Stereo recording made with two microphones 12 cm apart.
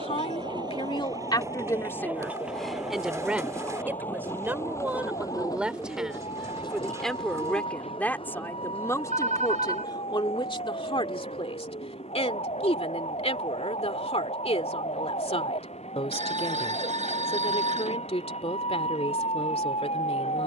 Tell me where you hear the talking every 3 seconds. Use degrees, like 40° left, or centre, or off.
30° left, 10° right, 10° left, 40° left, 60° left, 60° left, 60° left.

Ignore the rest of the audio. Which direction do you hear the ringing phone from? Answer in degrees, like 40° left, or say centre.
80° right.